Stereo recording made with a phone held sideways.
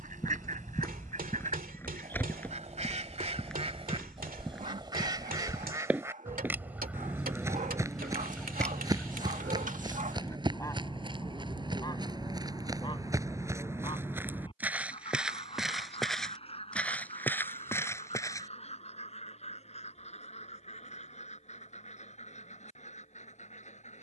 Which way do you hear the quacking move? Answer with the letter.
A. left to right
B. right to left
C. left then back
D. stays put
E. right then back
B.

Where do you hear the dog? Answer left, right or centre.
right.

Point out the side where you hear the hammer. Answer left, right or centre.
right.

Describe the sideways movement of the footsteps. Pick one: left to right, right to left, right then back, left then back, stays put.
right then back.